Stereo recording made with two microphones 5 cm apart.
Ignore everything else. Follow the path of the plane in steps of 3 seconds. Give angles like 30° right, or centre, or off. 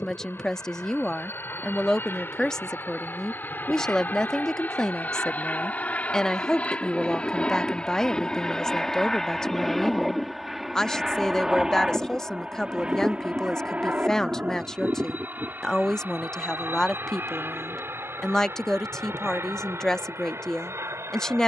50° left, 40° left, 20° left, centre, 30° right, 40° right, 50° right.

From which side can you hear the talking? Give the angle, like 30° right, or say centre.
10° left.